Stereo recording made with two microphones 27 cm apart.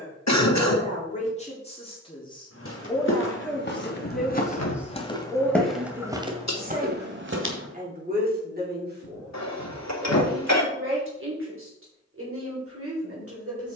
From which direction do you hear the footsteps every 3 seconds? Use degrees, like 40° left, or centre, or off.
50° left, 30° left, 30° right, off, off.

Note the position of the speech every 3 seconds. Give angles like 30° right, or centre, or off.
20° left, centre, 30° right, 50° right, 50° right.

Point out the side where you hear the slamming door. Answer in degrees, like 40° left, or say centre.
70° left.